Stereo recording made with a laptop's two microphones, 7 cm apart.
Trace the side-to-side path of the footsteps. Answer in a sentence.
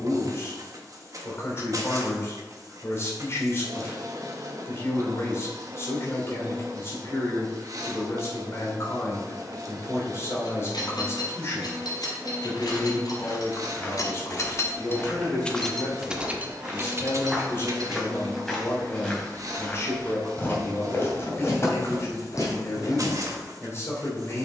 You can hear the footsteps go right and come back.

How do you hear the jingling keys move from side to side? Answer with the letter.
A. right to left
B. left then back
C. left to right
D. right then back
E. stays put
C.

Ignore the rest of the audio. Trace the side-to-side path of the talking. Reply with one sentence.
You can hear the talking stay in one place.